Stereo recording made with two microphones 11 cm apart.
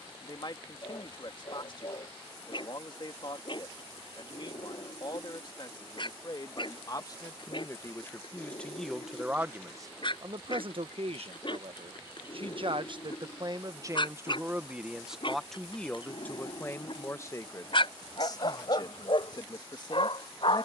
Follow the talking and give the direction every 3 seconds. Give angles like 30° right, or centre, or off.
50° left, 50° left, 30° left, 40° right, 30° right, 20° left, 40° left.